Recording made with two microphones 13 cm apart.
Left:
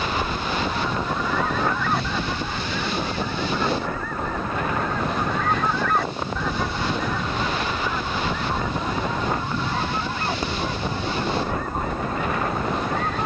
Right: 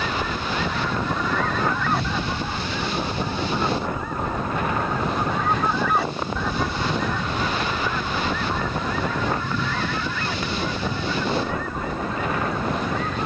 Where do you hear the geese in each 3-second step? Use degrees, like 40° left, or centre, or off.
10° left, 10° right, 10° left, 30° left, 50° left.